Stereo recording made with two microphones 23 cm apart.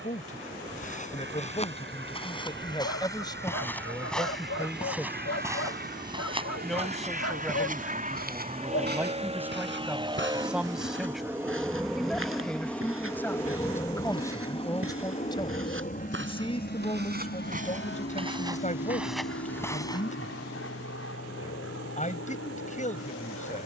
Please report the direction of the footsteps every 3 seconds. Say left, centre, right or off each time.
left, centre, right, right, right, right, centre, off.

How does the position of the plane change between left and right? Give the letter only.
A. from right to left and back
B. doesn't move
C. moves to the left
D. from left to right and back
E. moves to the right
C.